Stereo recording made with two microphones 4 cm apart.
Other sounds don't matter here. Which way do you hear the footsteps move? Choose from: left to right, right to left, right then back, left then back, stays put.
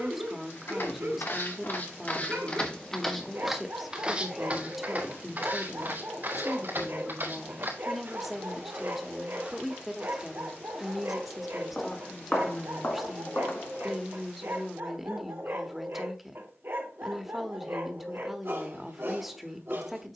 right then back.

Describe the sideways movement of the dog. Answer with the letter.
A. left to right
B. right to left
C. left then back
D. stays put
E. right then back
D.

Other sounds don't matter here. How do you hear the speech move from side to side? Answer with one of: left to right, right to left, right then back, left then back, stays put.
stays put.